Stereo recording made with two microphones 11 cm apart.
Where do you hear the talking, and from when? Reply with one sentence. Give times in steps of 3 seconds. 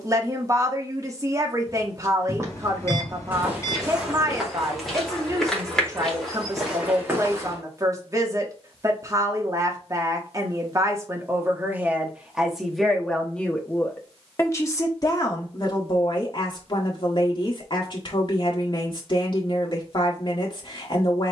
You can hear the talking on the right from 0 s, in the centre from 12 s and on the left from 15 s.